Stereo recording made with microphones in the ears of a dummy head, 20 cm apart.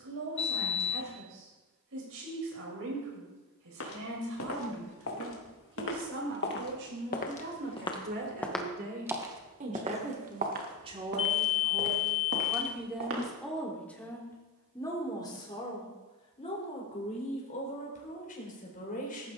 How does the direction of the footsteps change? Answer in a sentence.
You can hear the footsteps move from left to right.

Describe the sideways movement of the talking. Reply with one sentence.
You can hear the talking travel towards the left.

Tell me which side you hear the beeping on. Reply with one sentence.
In this clip you hear the beeping on the left.